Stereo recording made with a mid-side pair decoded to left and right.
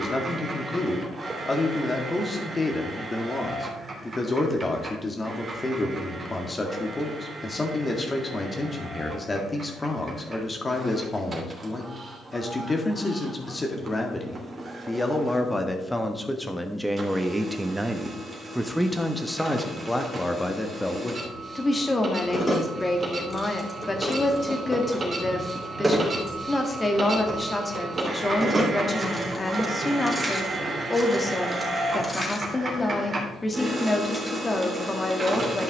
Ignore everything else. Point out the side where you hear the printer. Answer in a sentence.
You can hear the printer on the right.